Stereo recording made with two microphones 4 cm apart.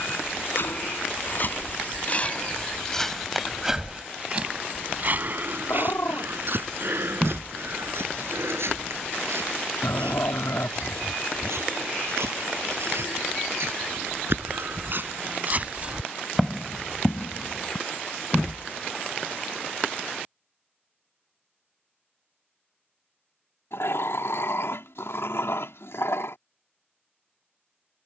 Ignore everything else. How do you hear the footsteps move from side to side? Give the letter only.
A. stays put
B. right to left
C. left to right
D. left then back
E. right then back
E.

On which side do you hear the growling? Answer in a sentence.
You can hear the growling on the left.